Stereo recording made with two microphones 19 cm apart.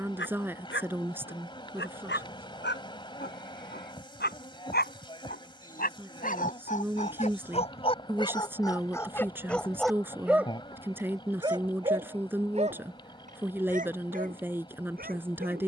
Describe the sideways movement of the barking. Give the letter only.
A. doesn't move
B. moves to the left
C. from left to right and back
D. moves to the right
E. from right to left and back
D.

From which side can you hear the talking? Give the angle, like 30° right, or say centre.
10° right.